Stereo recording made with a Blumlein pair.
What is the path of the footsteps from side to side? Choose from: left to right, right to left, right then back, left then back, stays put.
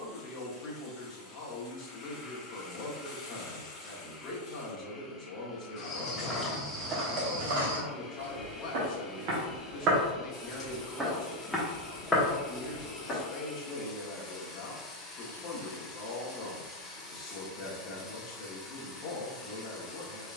right then back.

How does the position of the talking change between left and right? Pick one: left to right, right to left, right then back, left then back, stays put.
stays put.